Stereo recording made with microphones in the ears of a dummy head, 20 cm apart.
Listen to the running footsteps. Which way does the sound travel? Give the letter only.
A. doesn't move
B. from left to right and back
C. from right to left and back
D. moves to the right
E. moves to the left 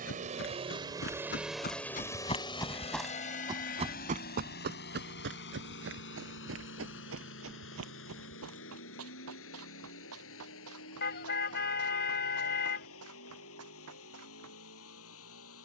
D.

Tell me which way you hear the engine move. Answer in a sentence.
In this clip you hear the engine go from the right side to the left.